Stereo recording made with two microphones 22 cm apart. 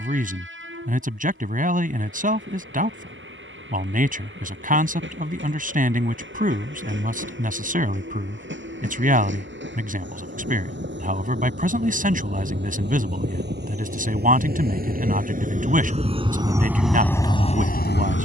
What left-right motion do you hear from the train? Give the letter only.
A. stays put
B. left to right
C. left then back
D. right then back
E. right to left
E.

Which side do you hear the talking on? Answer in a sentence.
In this clip you hear the talking on the right.